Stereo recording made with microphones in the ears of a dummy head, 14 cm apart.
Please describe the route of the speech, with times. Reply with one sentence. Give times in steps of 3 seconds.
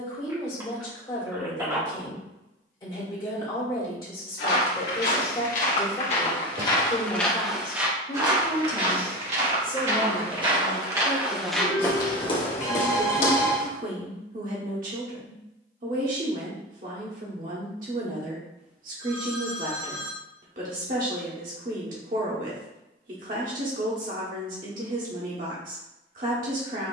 In this clip you hear the speech on the left from 0 s, in the centre from 9 s and on the right from 12 s.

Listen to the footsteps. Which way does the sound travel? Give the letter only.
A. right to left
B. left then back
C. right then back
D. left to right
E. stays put
C.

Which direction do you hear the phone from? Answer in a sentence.
You can hear the phone on the right.